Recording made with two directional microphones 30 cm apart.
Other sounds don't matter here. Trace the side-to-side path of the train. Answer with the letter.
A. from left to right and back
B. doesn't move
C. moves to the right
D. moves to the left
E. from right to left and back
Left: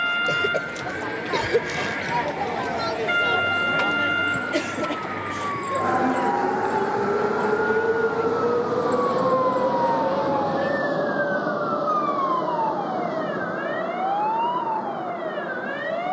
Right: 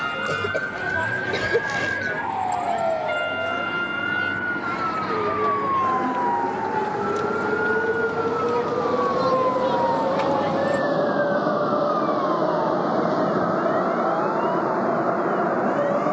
C.